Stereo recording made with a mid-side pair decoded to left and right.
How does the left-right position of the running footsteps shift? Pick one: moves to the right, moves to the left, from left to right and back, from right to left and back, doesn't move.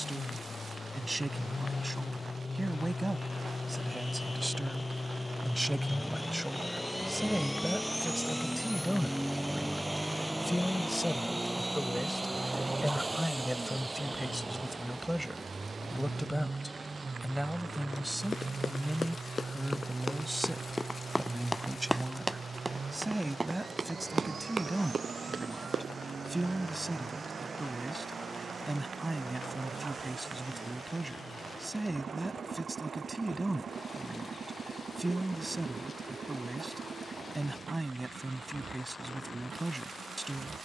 moves to the right.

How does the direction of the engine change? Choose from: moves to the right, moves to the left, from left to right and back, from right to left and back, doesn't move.
moves to the right.